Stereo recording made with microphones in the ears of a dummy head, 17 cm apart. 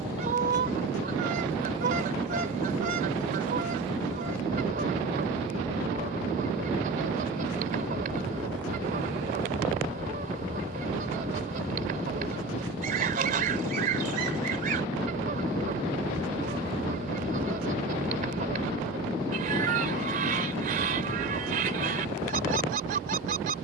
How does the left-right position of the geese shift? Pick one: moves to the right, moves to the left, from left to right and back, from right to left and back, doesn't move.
doesn't move.